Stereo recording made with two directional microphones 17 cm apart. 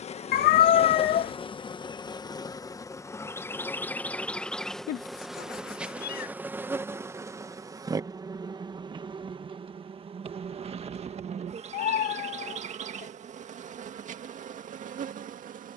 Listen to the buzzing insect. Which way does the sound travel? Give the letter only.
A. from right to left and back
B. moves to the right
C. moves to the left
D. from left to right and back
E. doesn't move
B.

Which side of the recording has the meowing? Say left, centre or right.
left.